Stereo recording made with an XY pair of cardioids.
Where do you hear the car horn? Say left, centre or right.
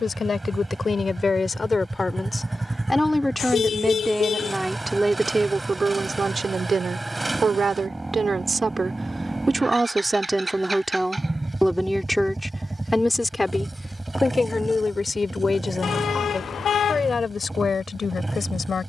left.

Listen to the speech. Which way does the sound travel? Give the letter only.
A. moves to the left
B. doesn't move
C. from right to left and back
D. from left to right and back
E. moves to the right
D.